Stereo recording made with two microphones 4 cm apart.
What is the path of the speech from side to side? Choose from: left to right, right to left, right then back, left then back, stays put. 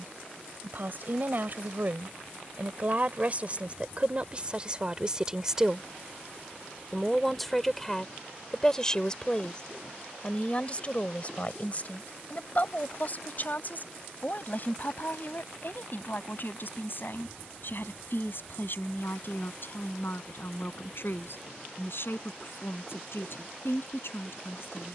right to left.